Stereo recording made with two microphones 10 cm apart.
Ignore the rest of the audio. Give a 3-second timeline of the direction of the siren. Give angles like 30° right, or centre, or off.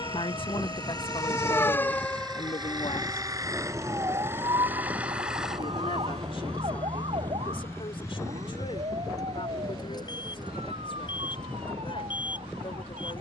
20° left, 40° right, 70° right, 70° right, 80° right.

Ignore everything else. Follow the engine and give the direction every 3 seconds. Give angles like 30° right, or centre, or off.
50° right, 20° right, 20° left, 40° left, 50° left.